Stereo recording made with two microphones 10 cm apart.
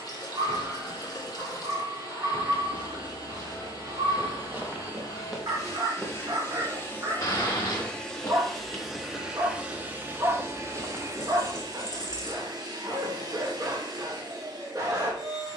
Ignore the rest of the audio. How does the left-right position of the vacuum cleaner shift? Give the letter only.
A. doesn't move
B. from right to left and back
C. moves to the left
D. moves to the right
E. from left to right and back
D.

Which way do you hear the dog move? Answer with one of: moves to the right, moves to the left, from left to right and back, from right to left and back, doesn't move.
doesn't move.